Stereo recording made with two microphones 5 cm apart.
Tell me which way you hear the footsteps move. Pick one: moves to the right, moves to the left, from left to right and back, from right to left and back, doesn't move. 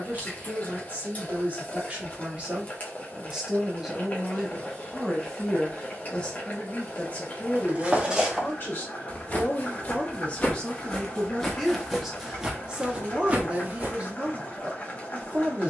from right to left and back.